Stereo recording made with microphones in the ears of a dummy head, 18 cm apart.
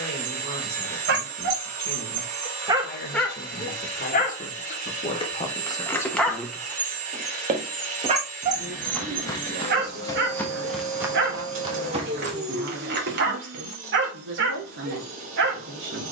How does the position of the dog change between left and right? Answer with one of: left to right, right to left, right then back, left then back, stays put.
left then back.